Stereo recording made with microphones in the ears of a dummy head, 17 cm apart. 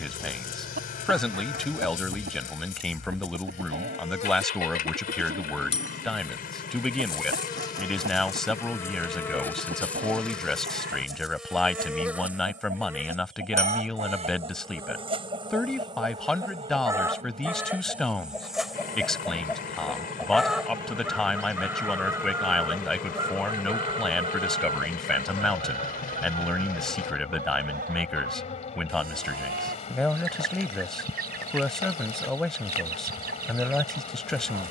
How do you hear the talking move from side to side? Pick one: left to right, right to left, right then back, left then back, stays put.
stays put.